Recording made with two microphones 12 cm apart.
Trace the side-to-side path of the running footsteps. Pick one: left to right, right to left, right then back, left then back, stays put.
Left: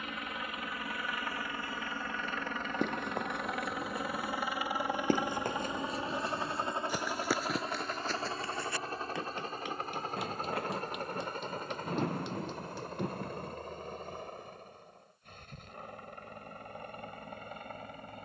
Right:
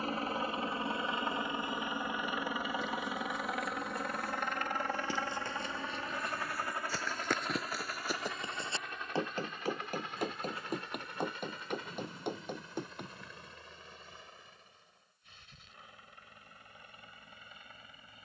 left to right.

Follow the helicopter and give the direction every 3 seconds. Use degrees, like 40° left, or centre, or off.
20° right, 10° left, 30° left, 40° left, 50° left, 50° left.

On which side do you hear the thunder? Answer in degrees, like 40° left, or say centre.
70° left.